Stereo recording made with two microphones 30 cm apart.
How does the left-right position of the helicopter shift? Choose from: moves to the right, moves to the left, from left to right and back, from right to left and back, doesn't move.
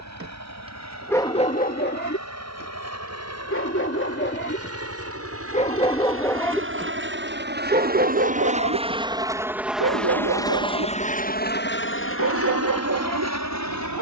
moves to the left.